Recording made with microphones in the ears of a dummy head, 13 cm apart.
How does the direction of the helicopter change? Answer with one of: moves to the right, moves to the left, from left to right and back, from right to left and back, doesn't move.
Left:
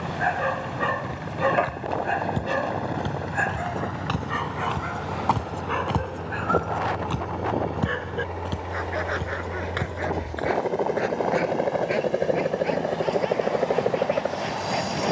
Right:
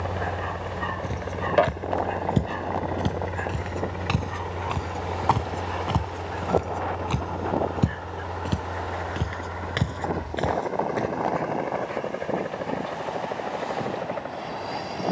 moves to the left.